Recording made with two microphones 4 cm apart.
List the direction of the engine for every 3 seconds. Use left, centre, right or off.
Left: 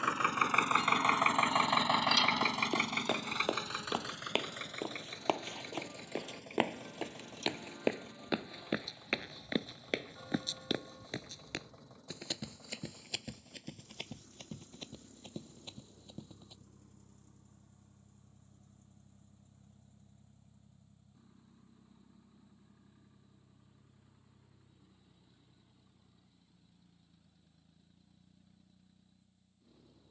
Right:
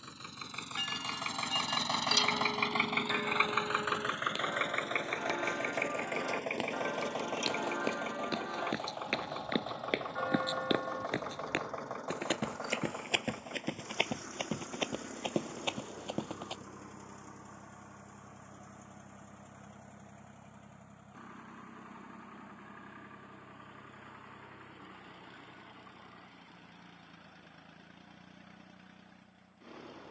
left, right, right, right, right, right, right, right, right, right.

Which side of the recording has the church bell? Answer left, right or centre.
right.